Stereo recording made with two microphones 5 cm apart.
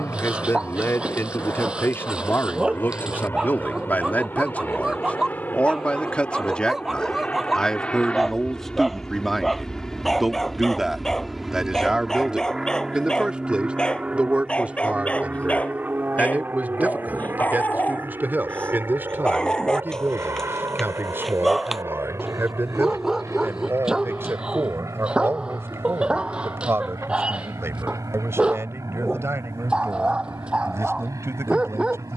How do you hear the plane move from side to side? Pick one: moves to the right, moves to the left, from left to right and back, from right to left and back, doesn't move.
moves to the right.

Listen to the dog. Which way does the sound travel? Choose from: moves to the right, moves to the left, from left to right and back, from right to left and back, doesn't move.
from right to left and back.